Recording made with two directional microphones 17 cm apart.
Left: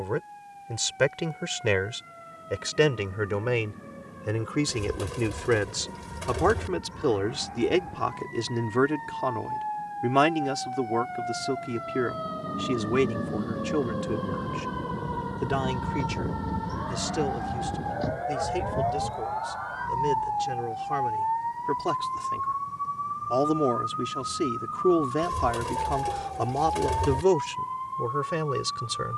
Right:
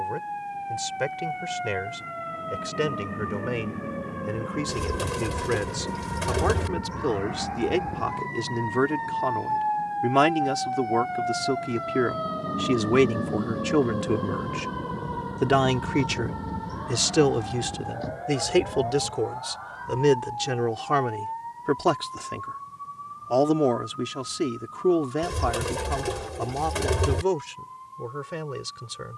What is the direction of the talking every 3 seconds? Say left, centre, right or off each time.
left, left, centre, centre, right, right, right, right, centre, left.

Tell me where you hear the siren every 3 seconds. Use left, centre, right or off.
right, right, right, right, centre, centre, left, left, left, left.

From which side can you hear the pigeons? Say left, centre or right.
right.